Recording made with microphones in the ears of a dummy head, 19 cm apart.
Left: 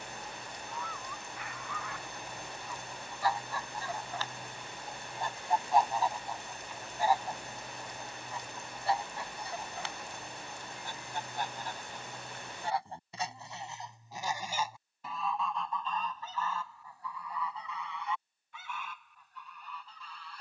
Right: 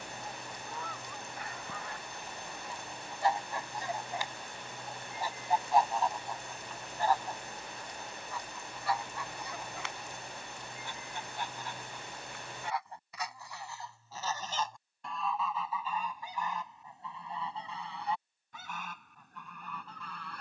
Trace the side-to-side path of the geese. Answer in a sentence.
In this clip you hear the geese go left and come back.